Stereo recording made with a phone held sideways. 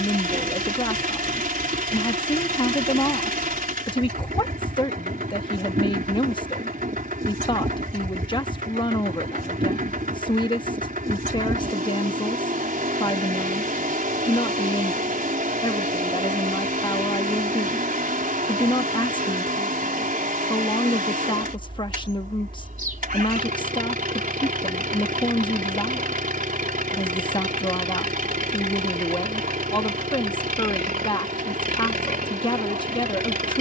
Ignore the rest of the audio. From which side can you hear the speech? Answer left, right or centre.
left.